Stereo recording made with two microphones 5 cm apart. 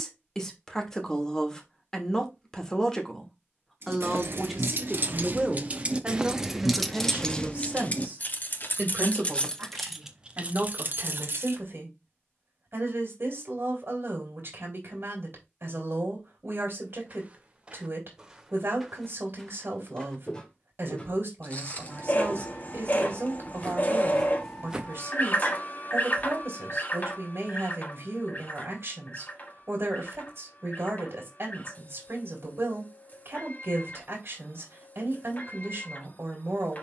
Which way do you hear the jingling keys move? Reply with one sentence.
You can hear the jingling keys move from right to left and back again.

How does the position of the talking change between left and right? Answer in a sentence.
You can hear the talking move from left to right.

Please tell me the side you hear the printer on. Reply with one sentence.
You can hear the printer on the left.